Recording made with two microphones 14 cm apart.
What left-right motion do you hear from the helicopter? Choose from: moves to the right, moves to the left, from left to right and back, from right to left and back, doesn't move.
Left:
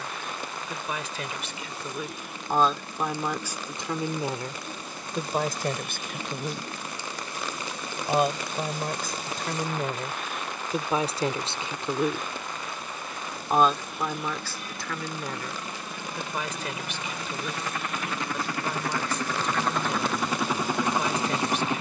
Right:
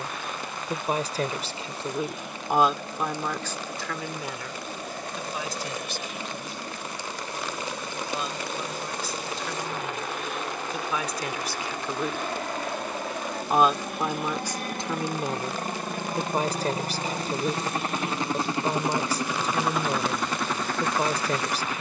moves to the left.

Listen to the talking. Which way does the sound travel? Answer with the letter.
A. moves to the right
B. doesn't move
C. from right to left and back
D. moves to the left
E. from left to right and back
C.